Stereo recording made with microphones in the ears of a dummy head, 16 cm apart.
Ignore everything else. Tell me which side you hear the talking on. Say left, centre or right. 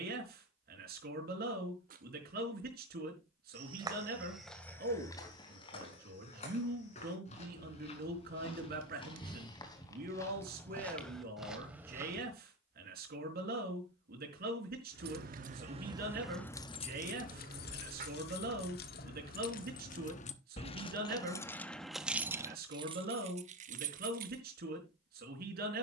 right.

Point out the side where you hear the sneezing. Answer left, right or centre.
right.